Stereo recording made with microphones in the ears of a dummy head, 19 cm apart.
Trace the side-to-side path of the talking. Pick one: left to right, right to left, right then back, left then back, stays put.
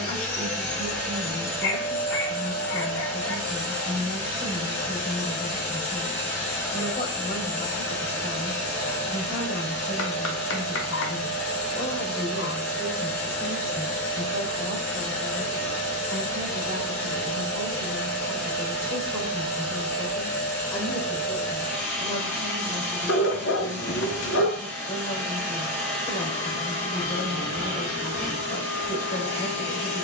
right then back.